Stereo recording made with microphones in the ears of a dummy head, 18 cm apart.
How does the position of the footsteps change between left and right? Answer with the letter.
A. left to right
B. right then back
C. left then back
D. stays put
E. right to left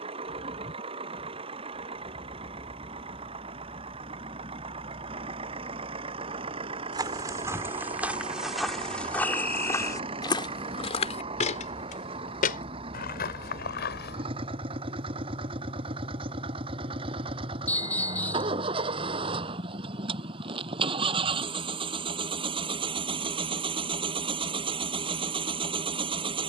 E.